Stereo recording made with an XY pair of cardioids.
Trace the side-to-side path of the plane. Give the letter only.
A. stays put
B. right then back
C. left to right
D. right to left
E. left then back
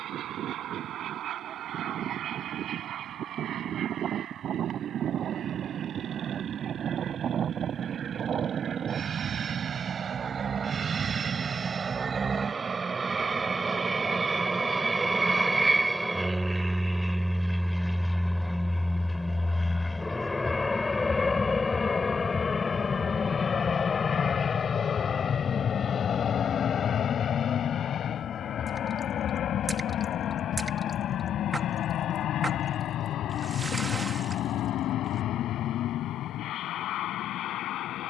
D.